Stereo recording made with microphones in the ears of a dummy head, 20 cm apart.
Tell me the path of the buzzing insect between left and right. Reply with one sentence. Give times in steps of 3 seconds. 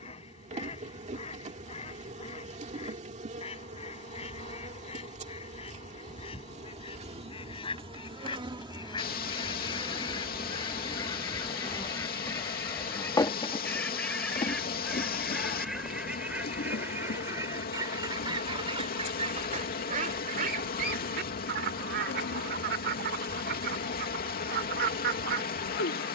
In this clip you hear the buzzing insect on the right from 0 s, in the centre from 9 s and on the left from 12 s.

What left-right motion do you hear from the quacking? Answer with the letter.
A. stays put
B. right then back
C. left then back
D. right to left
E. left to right
E.